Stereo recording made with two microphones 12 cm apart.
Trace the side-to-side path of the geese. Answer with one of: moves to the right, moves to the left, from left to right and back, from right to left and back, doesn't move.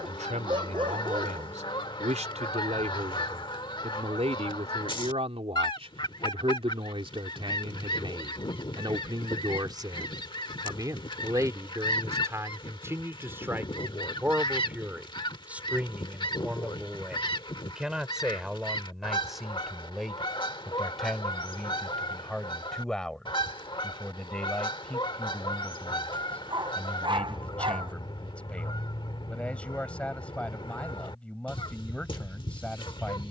doesn't move.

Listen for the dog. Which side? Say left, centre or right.
right.